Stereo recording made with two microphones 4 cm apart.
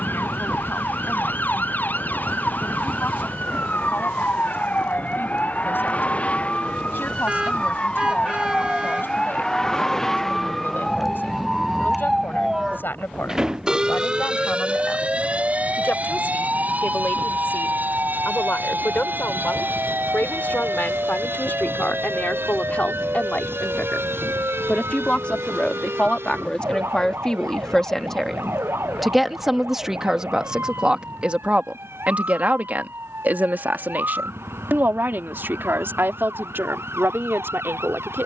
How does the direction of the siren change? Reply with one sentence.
In this clip you hear the siren move to the right.